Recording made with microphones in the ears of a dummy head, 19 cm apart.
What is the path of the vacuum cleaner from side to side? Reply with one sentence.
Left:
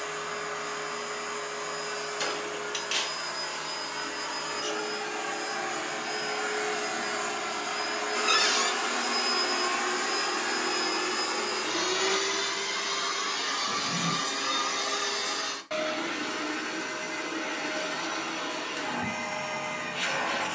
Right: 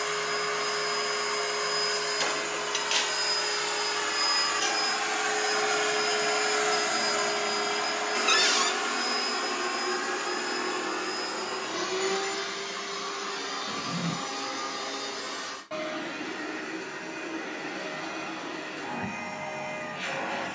You can hear the vacuum cleaner go from the right side to the left.